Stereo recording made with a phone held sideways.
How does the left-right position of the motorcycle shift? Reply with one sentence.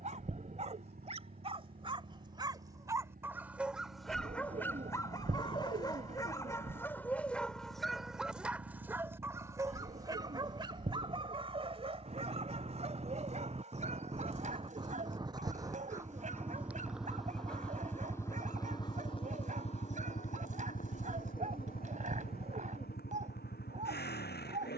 You can hear the motorcycle move to the left.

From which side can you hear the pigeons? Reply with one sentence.
You can hear the pigeons on the right.